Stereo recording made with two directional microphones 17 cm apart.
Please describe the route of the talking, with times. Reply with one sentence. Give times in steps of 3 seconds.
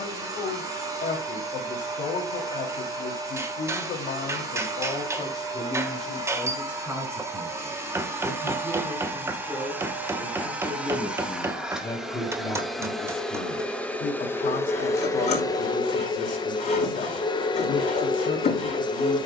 You can hear the talking on the left from 0 s, in the centre from 6 s and on the left from 12 s.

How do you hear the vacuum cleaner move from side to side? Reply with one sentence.
You can hear the vacuum cleaner move from right to left.